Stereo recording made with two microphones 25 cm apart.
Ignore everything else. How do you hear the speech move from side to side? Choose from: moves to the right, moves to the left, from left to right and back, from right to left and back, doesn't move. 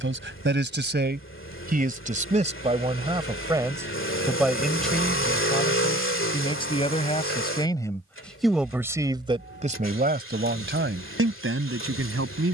from right to left and back.